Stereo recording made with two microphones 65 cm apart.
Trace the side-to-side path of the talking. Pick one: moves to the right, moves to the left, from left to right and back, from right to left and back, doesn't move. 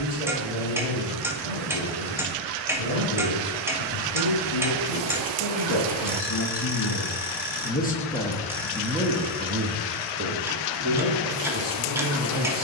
moves to the right.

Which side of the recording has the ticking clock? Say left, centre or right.
centre.